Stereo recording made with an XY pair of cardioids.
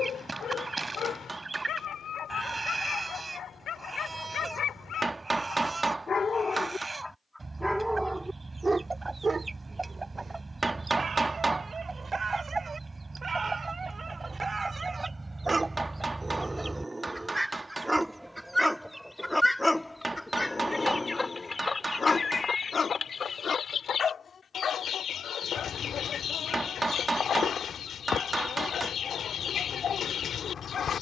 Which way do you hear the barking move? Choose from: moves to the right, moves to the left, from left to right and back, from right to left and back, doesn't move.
from left to right and back.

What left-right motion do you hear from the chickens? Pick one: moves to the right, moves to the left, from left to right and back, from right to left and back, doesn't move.
moves to the left.